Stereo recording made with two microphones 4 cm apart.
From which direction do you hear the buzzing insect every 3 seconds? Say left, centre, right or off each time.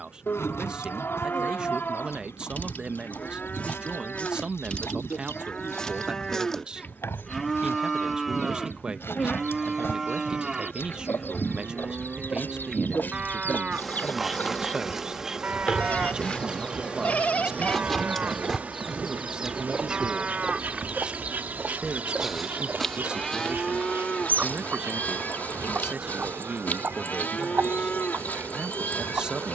left, left, left, left, centre, right, right, right, right, right.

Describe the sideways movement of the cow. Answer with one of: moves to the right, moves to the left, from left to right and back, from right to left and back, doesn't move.
from left to right and back.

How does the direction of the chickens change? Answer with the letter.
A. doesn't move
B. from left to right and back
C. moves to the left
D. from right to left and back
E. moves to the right
E.